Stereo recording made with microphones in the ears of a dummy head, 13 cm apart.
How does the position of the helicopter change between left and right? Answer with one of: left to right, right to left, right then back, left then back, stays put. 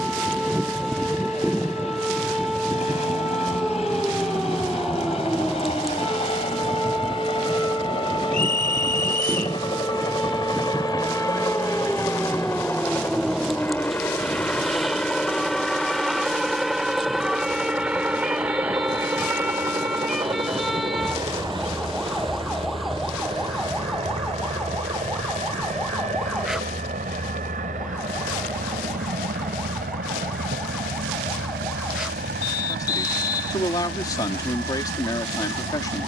left to right.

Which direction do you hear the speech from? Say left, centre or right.
left.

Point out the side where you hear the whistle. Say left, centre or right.
left.